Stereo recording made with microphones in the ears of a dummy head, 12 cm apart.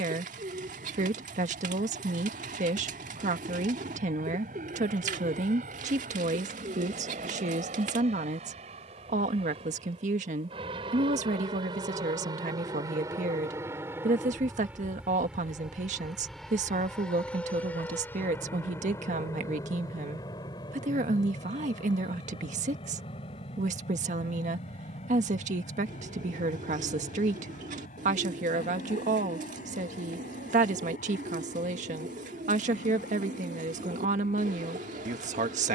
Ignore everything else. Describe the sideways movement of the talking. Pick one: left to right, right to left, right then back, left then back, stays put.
stays put.